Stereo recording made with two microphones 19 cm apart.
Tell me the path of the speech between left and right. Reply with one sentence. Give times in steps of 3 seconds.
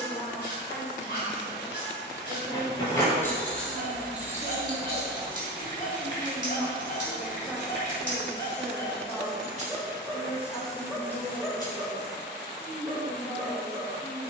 You can hear the speech on the right from 0 s, in the centre from 6 s and on the left from 9 s.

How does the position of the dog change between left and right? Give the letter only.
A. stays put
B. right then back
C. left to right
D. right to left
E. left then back
C.